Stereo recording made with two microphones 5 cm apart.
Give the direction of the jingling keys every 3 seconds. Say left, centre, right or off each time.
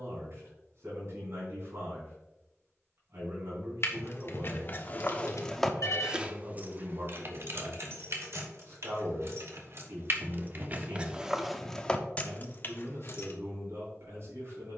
off, left, right, right, left.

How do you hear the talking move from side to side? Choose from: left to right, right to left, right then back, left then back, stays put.
stays put.